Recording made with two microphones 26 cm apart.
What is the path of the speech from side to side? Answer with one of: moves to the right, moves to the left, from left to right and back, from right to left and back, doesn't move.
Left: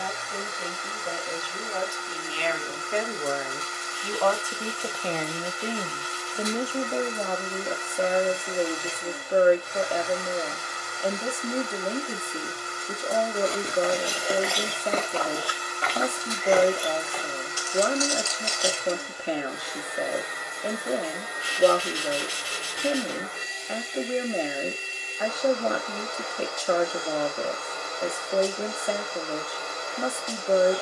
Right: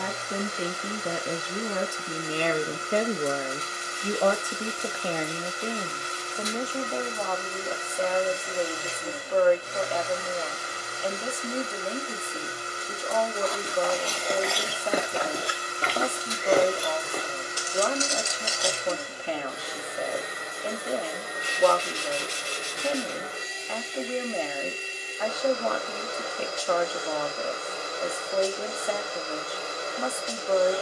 moves to the left.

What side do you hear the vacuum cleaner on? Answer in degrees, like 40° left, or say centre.
30° right.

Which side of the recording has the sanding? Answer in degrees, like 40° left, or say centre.
10° left.